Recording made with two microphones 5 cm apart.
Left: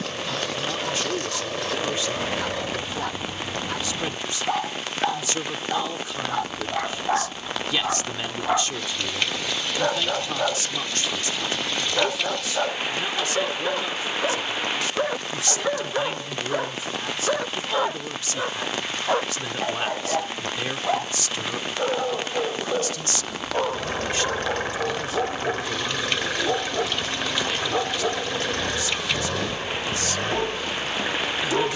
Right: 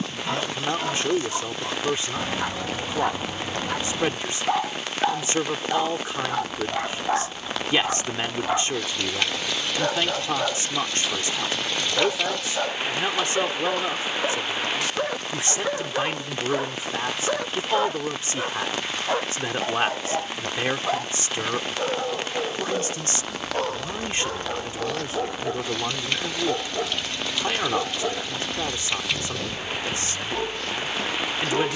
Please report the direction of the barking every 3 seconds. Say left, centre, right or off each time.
right, centre, centre, centre, centre, centre, centre, centre, centre, centre, centre.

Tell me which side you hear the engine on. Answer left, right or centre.
left.